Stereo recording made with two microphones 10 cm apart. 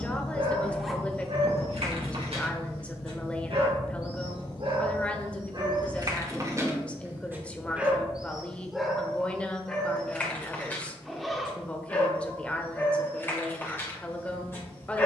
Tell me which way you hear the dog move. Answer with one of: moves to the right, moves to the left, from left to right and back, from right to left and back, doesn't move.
moves to the left.